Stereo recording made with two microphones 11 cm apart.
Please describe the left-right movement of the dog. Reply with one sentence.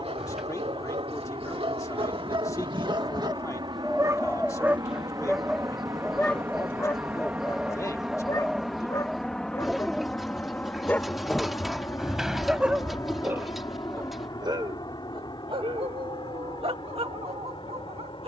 You can hear the dog go left and come back.